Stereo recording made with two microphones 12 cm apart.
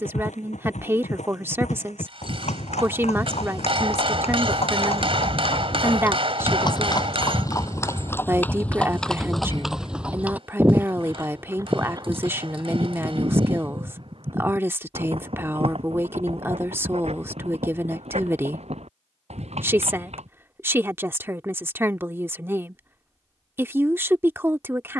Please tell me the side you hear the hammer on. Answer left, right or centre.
right.